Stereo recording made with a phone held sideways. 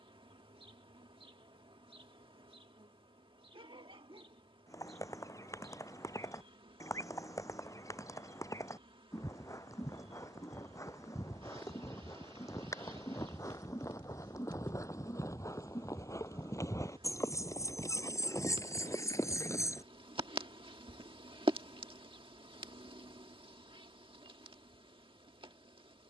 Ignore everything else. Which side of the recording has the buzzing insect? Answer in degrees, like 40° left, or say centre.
40° right.